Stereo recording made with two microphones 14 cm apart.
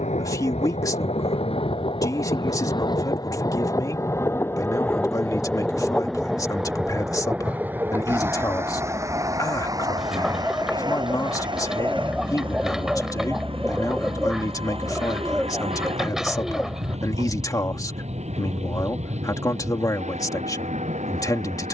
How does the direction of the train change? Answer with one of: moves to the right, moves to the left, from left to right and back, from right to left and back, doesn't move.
moves to the right.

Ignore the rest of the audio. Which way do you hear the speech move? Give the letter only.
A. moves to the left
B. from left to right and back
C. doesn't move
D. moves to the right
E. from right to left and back
C.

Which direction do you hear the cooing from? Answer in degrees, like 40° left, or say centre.
centre.